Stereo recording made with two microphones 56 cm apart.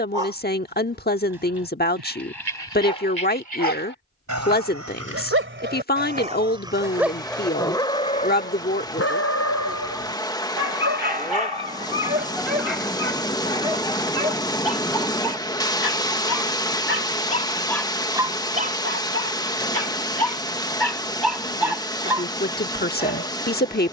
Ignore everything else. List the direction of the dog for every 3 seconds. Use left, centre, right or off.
right, right, centre, left, left, centre, right, right.